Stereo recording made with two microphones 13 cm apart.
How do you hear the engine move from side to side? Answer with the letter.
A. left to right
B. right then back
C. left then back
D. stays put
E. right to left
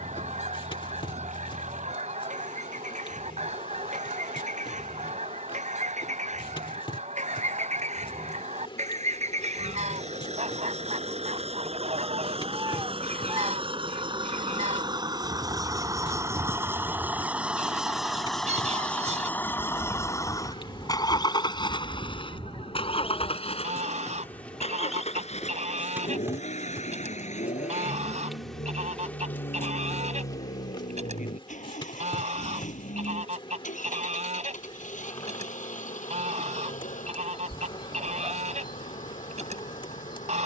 E.